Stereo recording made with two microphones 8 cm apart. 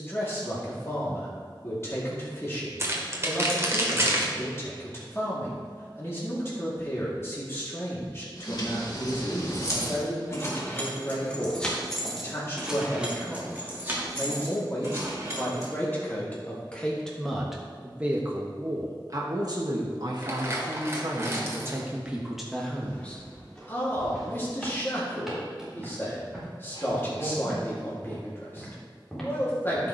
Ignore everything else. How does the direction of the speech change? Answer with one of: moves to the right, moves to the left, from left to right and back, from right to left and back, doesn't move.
from left to right and back.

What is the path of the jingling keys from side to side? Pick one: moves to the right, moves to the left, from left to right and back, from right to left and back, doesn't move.
moves to the right.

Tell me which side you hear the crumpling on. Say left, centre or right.
right.